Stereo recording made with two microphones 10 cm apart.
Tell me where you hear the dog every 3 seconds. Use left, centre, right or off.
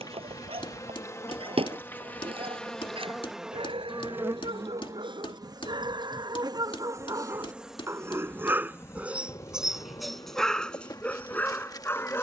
right, right, right, centre.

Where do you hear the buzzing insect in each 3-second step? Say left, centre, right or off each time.
left, right, centre, left.